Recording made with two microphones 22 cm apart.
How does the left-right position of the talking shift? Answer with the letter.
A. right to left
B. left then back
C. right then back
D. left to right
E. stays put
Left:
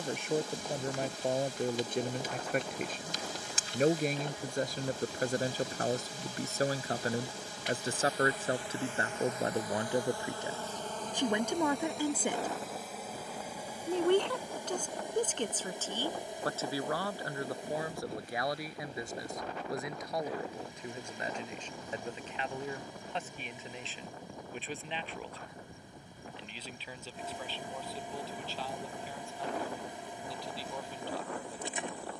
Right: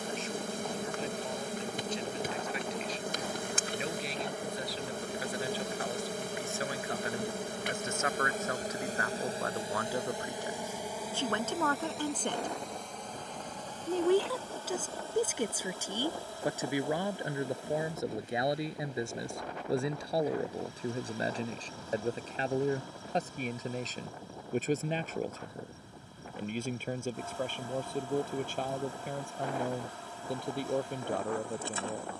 D.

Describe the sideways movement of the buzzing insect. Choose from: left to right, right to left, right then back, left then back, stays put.
right to left.